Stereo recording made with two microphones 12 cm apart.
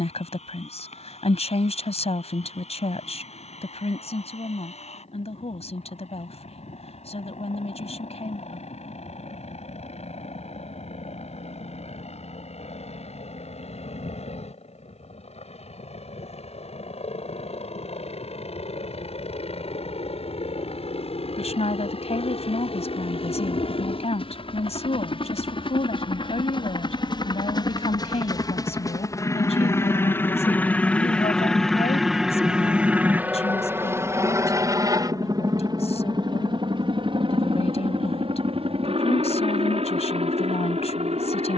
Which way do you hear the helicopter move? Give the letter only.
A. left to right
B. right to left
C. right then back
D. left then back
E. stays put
A.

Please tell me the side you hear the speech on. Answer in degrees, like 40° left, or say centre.
60° left.